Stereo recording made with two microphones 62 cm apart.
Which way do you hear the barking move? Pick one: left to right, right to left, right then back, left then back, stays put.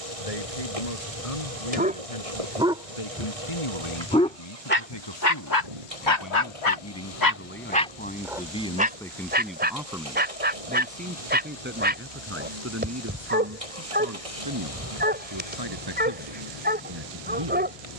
left then back.